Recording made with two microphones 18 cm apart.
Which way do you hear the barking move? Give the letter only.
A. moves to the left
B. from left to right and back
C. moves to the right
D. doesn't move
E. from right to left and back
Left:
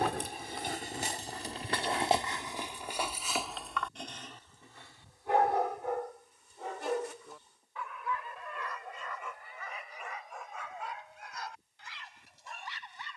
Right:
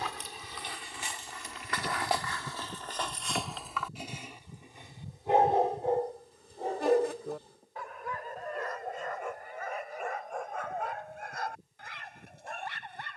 C.